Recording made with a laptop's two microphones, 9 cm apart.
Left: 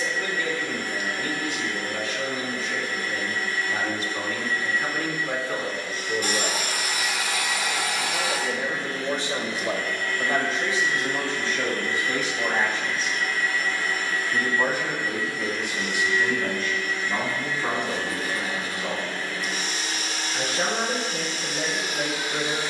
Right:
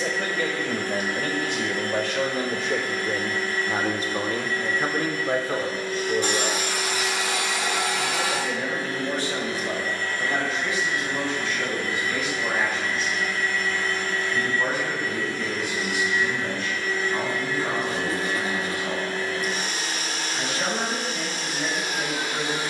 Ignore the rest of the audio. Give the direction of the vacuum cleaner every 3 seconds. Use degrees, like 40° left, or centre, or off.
50° right, 50° right, 50° right, 30° right, centre, 30° right, 50° right, 50° right.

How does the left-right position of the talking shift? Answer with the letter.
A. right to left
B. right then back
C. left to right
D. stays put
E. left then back
A.